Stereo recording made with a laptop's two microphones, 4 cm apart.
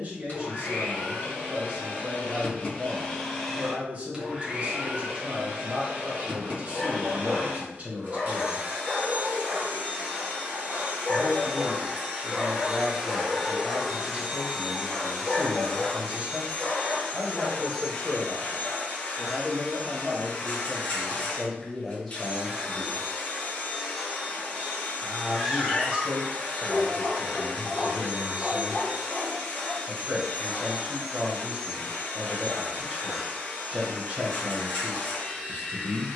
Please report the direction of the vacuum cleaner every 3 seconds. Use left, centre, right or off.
left, right, right, right, centre, left, left, left, left, left, left, left.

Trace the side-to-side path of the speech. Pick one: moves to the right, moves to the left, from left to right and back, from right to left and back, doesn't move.
from right to left and back.